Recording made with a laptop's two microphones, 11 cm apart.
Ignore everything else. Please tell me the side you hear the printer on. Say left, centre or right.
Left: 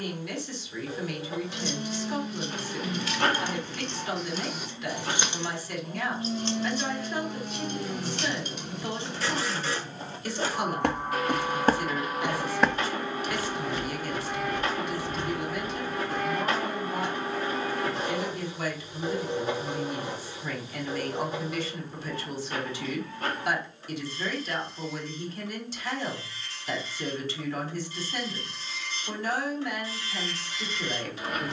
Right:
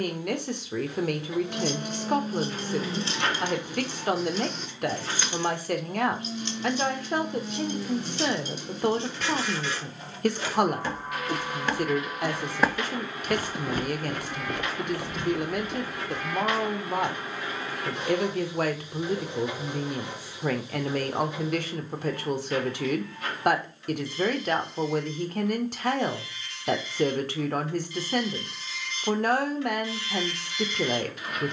left.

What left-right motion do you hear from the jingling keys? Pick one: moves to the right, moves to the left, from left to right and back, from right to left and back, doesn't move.
moves to the left.